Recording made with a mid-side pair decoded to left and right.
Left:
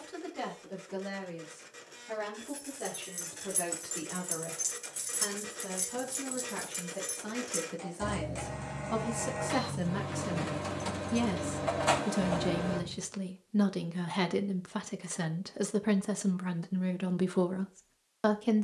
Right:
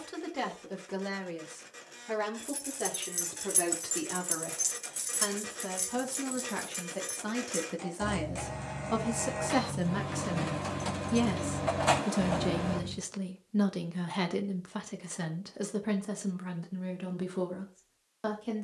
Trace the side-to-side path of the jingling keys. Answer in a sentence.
You can hear the jingling keys go left and come back.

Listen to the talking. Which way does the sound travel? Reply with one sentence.
You can hear the talking go from the right side to the left.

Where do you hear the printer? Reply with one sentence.
In this clip you hear the printer in the centre.